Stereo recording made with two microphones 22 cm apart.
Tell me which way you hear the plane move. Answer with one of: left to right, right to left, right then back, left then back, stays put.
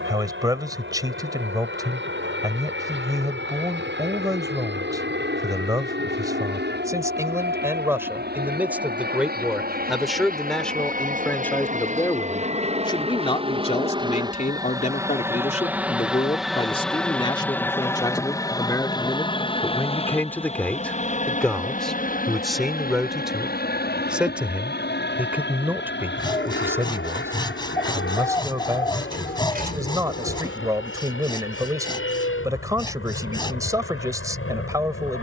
right to left.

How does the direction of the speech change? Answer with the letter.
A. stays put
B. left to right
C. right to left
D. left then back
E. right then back
D.